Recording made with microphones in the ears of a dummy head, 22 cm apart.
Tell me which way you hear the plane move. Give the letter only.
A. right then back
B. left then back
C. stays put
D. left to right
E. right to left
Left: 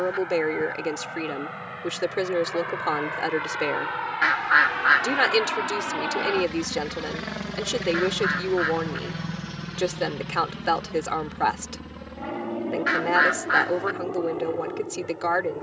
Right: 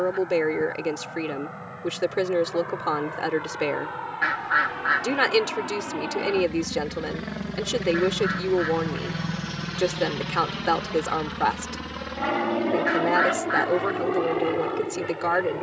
D.